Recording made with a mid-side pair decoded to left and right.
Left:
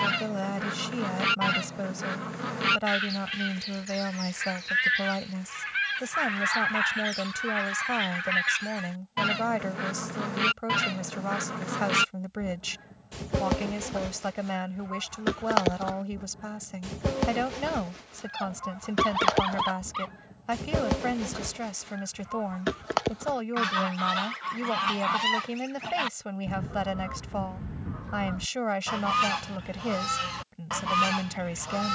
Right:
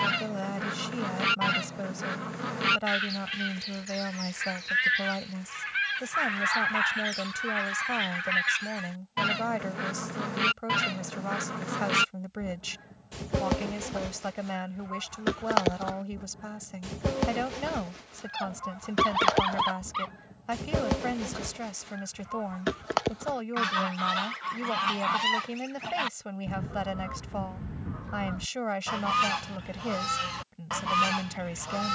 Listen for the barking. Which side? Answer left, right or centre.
centre.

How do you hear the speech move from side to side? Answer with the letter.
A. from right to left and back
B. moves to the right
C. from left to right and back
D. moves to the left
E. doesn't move
E.